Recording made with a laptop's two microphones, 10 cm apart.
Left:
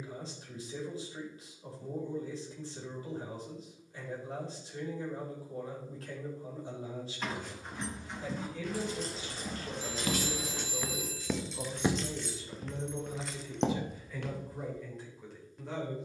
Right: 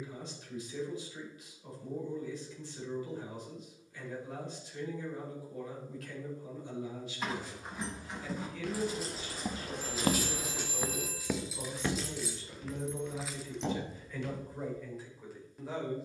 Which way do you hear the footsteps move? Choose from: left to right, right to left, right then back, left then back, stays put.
right to left.